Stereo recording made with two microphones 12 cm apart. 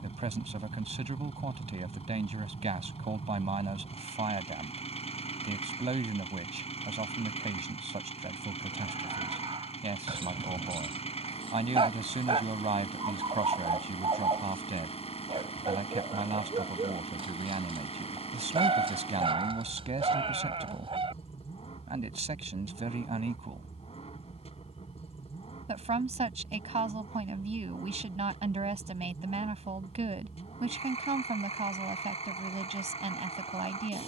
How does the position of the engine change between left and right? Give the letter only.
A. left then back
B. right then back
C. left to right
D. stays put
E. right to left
D.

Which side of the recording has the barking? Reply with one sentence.
You can hear the barking on the right.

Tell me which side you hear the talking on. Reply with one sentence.
You can hear the talking on the right.